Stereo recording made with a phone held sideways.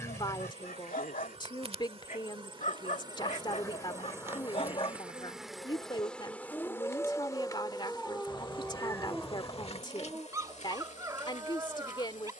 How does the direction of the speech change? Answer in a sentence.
You can hear the speech stay put.